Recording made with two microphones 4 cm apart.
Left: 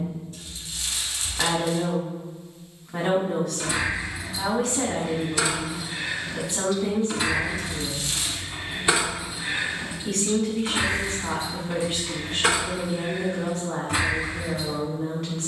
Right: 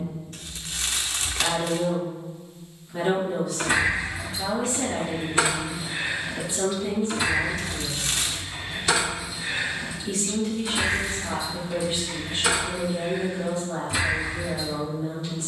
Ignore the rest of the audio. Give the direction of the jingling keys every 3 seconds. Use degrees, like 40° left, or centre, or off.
off, 40° right, 10° left, 40° left, 50° left.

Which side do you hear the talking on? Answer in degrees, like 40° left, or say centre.
70° left.